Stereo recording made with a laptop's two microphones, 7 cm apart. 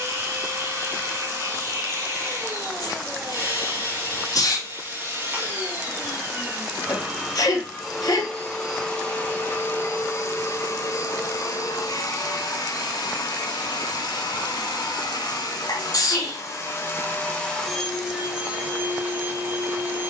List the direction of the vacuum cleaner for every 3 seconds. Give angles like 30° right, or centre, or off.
30° right, 30° right, 10° right, 40° left, 70° left, 40° left, 20° right.